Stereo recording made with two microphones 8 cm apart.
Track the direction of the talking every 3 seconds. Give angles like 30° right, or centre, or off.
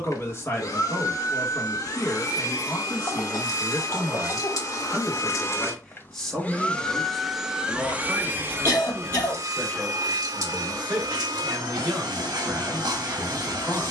30° left, 20° left, centre, 20° right, 20° right.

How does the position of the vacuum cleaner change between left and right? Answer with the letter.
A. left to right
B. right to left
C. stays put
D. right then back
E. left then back
A.